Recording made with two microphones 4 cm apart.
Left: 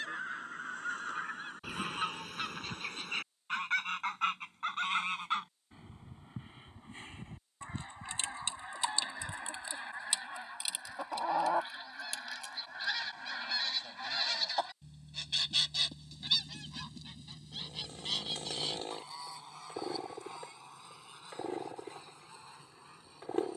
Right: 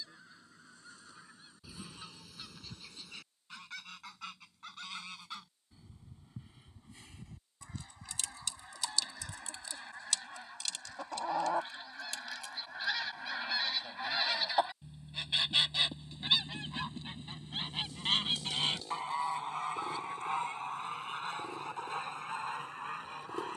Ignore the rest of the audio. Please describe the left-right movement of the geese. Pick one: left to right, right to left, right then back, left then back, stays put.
left to right.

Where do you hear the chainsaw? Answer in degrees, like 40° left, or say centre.
40° left.